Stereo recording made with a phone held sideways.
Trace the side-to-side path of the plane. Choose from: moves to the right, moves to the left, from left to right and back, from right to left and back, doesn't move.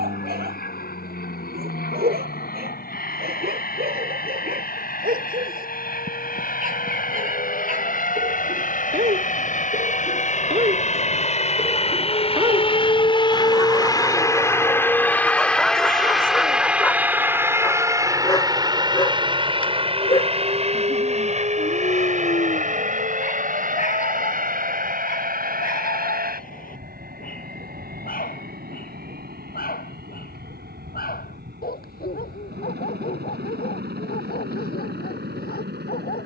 moves to the right.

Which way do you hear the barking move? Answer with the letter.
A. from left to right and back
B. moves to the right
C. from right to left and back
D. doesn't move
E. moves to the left
E.